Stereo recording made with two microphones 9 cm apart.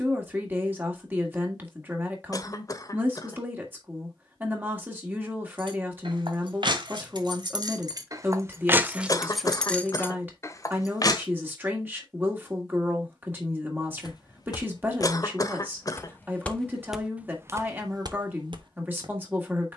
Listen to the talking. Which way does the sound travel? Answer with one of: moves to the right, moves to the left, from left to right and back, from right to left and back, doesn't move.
doesn't move.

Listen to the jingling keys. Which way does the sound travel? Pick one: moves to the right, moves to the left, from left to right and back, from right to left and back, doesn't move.
moves to the left.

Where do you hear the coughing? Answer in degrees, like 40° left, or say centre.
40° left.